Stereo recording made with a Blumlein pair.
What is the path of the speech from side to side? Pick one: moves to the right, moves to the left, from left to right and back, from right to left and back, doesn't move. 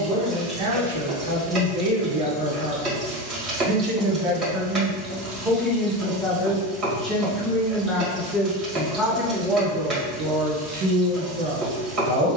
from right to left and back.